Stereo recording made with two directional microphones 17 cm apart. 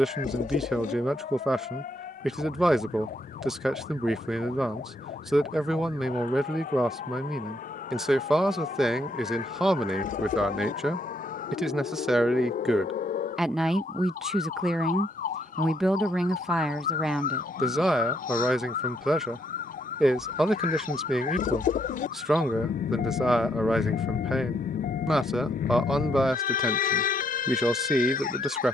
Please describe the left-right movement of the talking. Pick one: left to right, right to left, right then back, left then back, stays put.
stays put.